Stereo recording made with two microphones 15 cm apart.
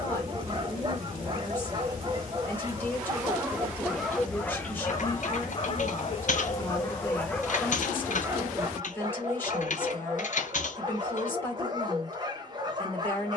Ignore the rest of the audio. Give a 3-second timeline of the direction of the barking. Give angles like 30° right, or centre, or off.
30° right, 10° left, 10° left, 30° right, 30° right.